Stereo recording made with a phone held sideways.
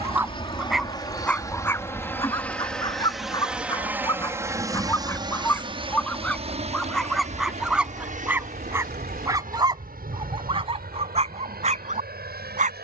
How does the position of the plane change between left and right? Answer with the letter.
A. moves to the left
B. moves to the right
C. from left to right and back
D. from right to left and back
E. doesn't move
B.